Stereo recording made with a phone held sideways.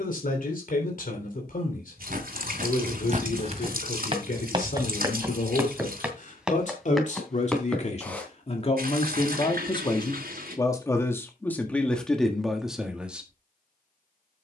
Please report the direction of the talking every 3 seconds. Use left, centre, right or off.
left, left, left, left, centre.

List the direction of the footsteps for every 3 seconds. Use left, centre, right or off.
right, right, centre, off, off.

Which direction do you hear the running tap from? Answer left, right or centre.
right.